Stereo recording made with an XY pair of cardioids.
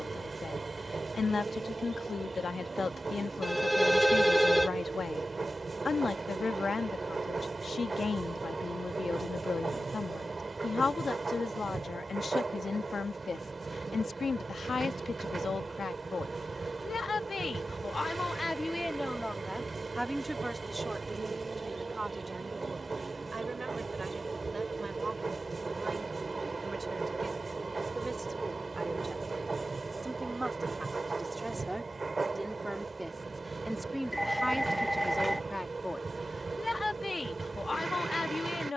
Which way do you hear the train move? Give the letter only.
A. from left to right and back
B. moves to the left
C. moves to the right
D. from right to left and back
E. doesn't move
E.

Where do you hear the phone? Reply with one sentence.
In this clip you hear the phone in the centre.